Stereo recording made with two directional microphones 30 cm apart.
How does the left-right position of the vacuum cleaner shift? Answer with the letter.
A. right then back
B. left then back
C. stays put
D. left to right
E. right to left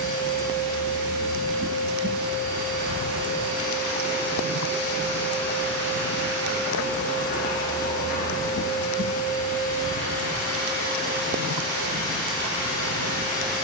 C.